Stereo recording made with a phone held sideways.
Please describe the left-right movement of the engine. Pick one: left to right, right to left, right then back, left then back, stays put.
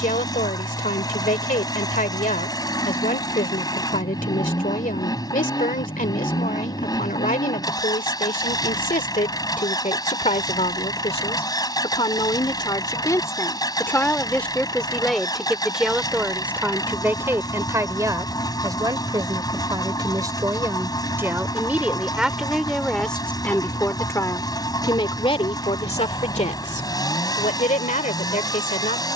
stays put.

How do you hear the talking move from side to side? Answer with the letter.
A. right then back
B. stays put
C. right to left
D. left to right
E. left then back
A.